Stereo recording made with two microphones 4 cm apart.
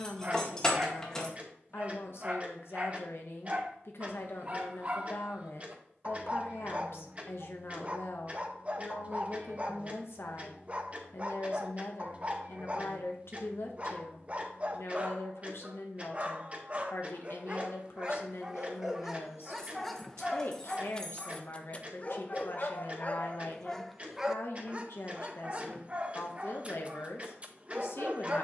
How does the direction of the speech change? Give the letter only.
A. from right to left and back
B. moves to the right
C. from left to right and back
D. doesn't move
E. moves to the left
D.